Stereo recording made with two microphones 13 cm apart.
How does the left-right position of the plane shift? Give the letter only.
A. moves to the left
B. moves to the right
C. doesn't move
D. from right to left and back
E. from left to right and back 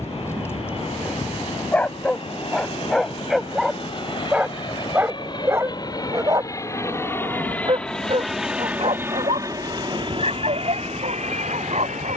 B.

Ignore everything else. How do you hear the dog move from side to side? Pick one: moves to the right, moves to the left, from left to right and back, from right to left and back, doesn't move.
moves to the right.